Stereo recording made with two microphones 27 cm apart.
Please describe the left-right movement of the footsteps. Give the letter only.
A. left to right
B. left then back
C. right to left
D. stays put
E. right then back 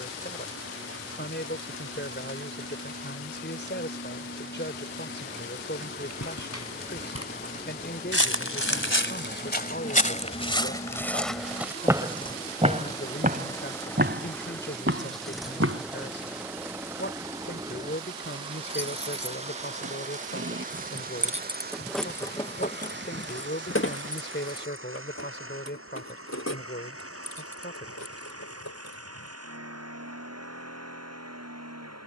A.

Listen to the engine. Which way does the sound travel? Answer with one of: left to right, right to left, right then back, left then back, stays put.
left to right.